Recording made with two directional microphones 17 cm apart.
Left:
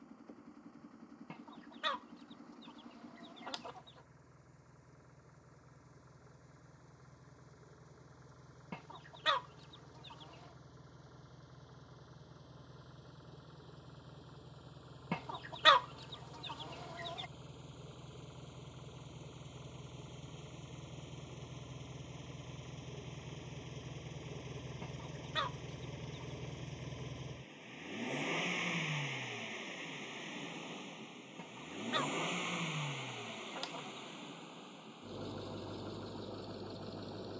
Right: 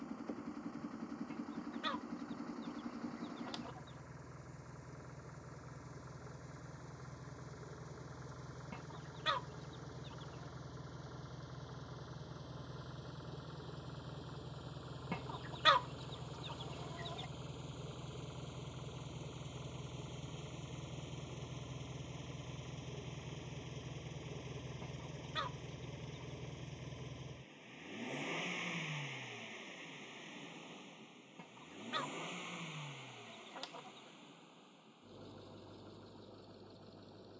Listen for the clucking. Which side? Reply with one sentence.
In this clip you hear the clucking on the left.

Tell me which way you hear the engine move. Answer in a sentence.
You can hear the engine move to the left.